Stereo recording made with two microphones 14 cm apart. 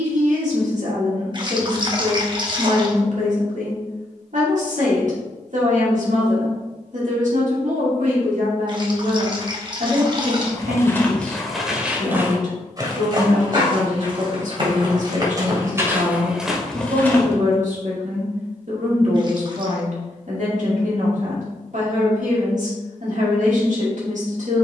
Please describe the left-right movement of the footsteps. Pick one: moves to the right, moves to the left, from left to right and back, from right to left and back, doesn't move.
from left to right and back.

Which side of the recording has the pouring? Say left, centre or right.
right.